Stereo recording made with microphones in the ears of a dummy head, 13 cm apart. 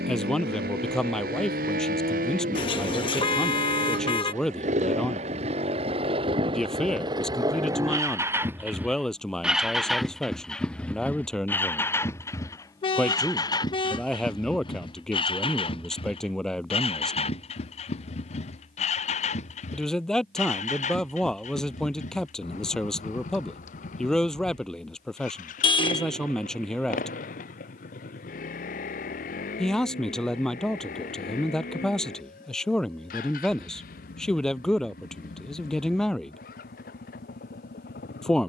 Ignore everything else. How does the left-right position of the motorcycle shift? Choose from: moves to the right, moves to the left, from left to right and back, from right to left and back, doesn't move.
moves to the left.